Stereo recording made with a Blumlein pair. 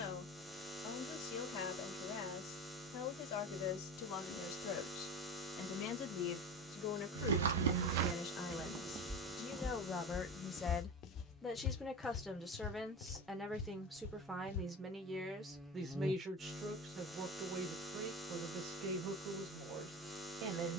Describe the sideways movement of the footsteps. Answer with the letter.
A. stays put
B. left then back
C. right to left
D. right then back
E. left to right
C.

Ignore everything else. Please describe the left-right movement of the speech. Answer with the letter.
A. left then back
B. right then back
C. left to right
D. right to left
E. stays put
C.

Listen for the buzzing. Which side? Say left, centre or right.
centre.